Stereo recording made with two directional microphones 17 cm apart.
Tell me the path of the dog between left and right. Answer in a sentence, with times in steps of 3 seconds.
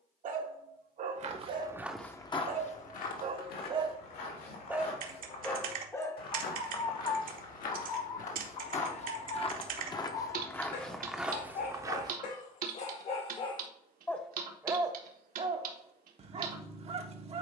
You can hear the dog on the right from 0 s, in the centre from 3 s, on the left from 6 s and on the right from 15 s.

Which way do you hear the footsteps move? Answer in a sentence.
In this clip you hear the footsteps move from right to left and back again.